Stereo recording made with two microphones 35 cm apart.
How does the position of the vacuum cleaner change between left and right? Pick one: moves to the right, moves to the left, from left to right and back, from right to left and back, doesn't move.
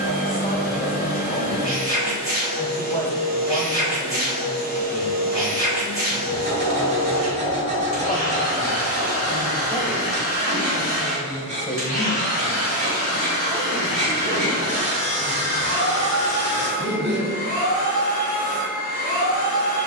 doesn't move.